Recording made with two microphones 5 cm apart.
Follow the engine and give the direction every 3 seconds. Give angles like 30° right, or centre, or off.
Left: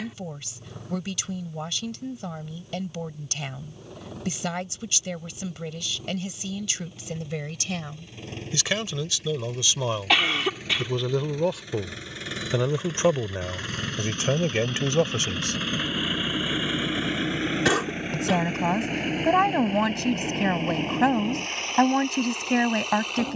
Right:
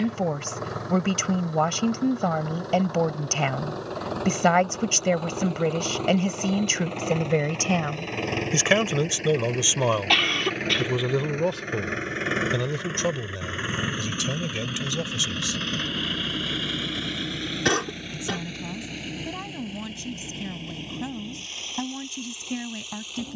80° right, 70° right, 60° right, 50° right, 20° right, 20° left, 40° left, 60° left.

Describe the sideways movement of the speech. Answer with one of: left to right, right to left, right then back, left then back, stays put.
right to left.